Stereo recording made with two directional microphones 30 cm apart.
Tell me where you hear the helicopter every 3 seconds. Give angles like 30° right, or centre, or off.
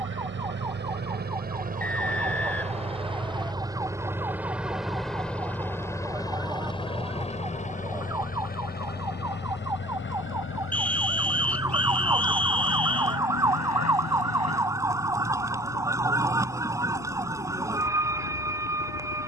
30° right, centre, 20° left, 40° left, 50° left, 60° left, 60° left.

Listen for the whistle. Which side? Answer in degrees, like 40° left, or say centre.
centre.